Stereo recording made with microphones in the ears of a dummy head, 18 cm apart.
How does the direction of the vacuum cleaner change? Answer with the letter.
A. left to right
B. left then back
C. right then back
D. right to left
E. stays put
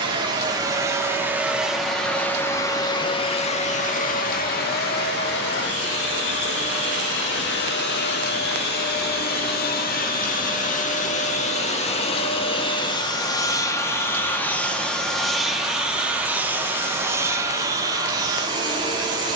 B.